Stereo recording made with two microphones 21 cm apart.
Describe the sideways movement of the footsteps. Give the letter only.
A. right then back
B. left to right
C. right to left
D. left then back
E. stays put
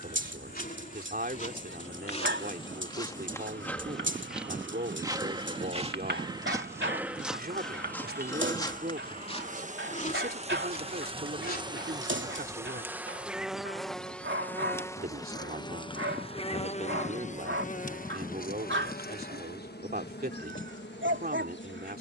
A.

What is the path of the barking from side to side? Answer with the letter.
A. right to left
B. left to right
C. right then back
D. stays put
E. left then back
D.